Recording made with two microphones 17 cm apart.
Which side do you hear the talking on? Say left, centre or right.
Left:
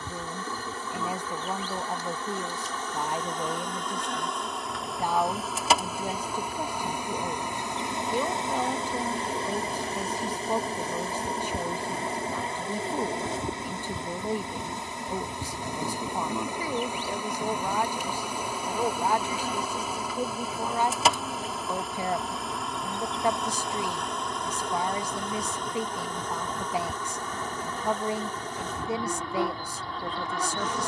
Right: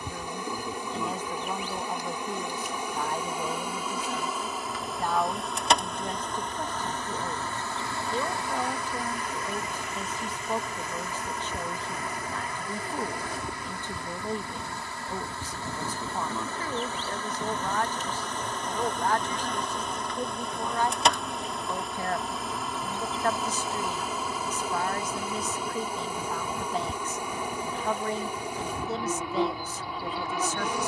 centre.